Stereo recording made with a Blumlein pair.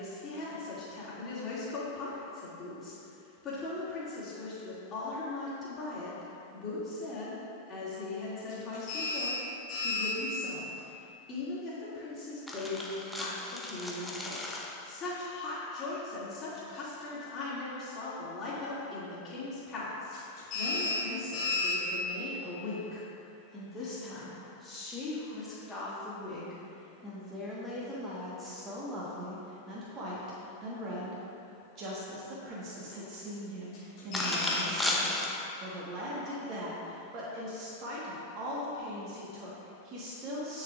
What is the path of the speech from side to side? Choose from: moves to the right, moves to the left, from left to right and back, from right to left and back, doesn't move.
moves to the right.